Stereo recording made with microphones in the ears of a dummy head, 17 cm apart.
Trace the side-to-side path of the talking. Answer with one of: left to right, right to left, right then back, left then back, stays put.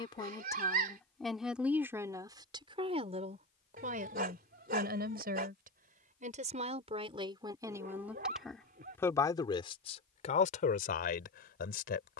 right then back.